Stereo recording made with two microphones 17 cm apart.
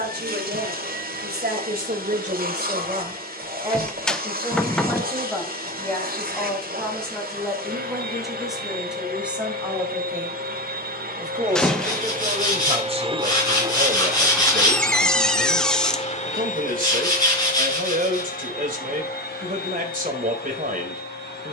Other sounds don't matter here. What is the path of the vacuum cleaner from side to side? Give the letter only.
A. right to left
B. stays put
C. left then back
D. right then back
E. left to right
A.